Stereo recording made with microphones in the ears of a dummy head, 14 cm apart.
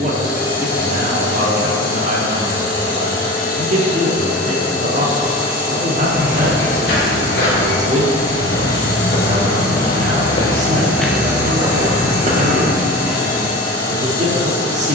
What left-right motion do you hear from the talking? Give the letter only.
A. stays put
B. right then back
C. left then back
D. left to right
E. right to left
A.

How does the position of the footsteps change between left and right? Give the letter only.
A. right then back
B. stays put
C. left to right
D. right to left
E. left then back
C.